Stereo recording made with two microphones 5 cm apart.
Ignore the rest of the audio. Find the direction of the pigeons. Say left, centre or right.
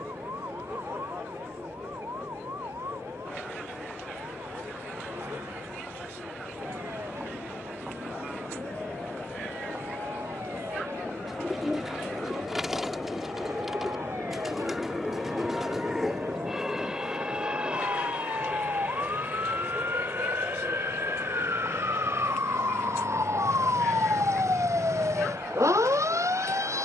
centre.